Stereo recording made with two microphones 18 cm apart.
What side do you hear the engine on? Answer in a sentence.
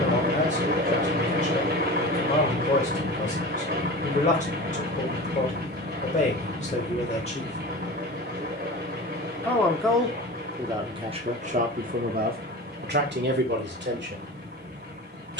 In this clip you hear the engine on the right.